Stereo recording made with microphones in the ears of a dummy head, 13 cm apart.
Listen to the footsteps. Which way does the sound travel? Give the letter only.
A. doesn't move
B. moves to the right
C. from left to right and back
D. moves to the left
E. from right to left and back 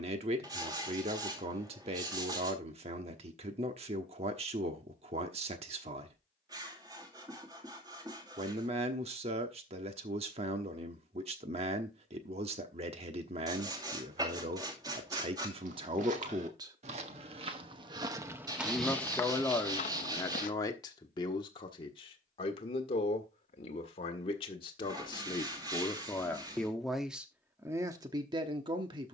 D.